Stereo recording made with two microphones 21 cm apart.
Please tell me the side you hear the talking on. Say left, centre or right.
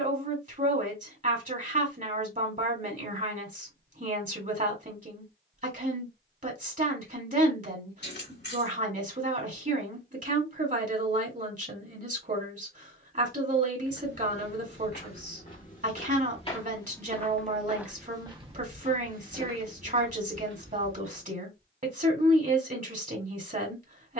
right.